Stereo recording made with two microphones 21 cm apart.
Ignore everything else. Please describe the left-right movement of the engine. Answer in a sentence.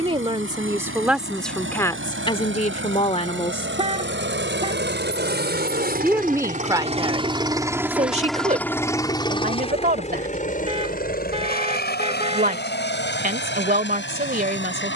In this clip you hear the engine travel towards the left.